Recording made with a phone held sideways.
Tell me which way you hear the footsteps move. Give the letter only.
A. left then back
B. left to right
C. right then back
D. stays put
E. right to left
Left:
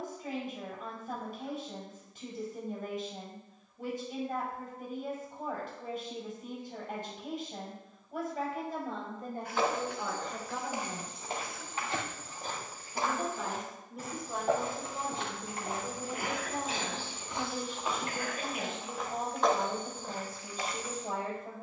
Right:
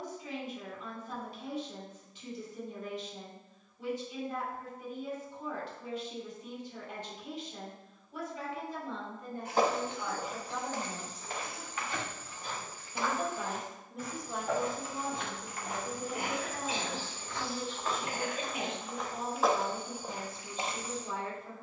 A.